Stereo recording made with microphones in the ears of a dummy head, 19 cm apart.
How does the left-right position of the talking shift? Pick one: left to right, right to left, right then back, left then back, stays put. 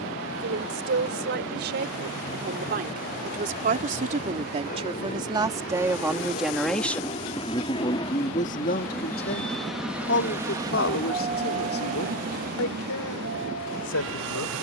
right to left.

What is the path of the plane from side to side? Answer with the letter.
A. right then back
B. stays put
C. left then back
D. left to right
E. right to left
D.